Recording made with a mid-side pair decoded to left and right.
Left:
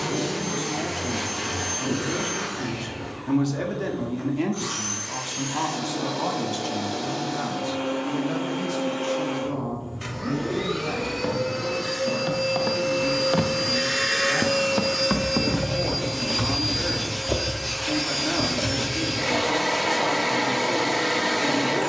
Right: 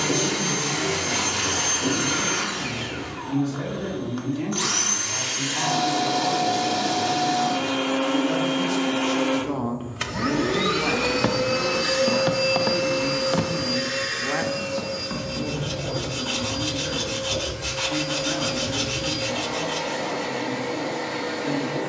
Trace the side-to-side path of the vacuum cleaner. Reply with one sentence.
You can hear the vacuum cleaner move to the left.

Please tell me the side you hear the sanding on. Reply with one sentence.
You can hear the sanding on the right.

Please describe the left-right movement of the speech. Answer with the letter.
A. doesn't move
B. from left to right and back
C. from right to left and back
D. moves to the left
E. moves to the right
B.